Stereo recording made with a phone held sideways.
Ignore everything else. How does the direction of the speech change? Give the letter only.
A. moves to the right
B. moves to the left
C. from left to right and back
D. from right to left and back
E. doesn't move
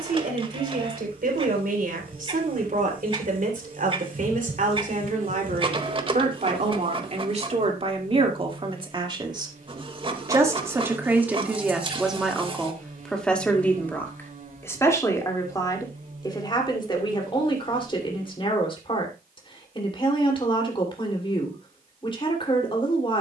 B.